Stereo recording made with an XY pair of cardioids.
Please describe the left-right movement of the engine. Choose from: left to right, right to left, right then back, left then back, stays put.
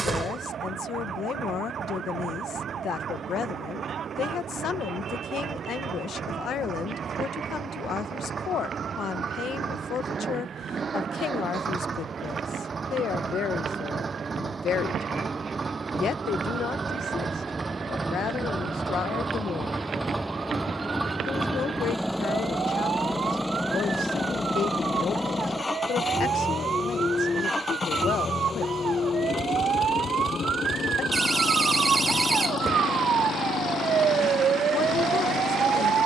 right to left.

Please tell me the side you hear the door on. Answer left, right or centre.
right.